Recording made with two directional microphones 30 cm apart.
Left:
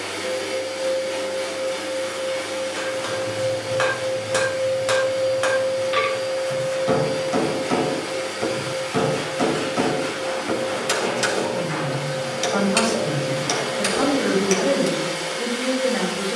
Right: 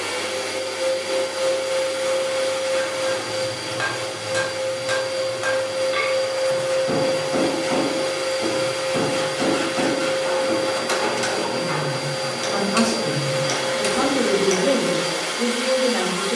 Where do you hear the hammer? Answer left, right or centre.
left.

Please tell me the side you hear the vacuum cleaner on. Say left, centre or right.
right.